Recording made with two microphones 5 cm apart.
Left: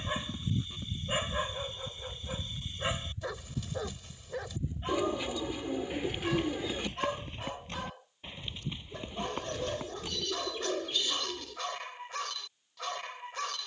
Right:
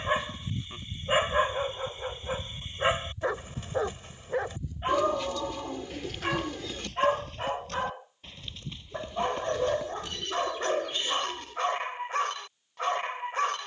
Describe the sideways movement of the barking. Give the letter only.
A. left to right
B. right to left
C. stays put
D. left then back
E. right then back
C.